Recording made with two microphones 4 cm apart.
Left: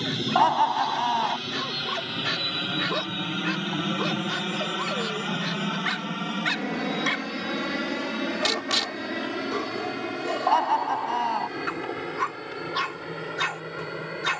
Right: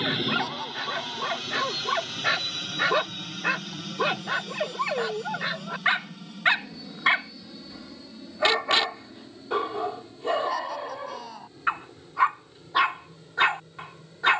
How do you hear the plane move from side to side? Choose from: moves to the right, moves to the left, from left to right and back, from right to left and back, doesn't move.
moves to the left.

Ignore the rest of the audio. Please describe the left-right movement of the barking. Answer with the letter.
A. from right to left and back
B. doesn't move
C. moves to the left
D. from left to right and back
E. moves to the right
B.